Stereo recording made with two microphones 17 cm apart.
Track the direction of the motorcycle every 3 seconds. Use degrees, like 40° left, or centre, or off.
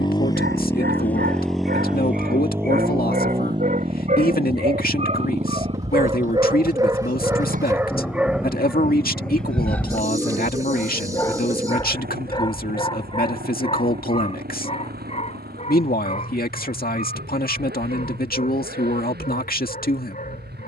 centre, 30° right, 50° right, 60° right, 60° right, 60° right, 70° right.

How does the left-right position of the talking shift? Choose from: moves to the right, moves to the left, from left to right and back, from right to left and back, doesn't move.
doesn't move.